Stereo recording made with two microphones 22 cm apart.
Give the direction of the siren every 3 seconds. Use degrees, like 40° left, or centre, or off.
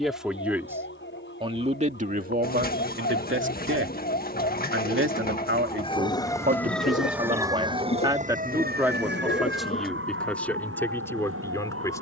60° left, 40° left, 10° right, 60° right.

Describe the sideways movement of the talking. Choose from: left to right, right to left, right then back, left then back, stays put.
right then back.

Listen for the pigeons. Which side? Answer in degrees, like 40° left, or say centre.
40° left.